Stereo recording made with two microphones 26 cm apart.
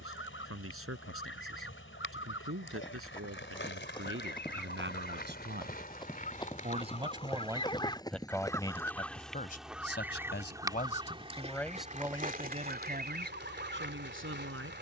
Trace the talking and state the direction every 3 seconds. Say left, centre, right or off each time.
right, right, centre, left, right.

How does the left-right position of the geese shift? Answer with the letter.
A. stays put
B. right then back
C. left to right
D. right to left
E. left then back
C.